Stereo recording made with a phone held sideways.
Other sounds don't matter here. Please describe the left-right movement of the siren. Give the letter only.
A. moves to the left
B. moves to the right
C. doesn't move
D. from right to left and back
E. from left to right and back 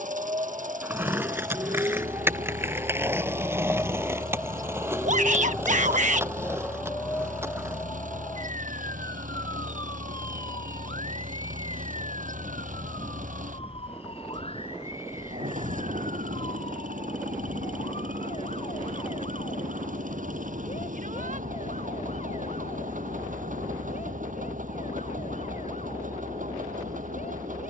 A.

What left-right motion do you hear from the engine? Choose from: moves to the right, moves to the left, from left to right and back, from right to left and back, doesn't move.
doesn't move.